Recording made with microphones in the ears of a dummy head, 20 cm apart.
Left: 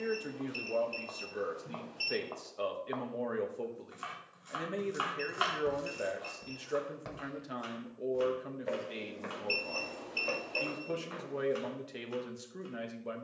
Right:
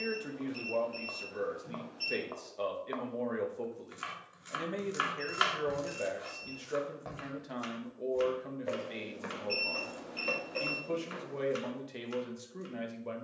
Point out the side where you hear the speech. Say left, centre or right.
centre.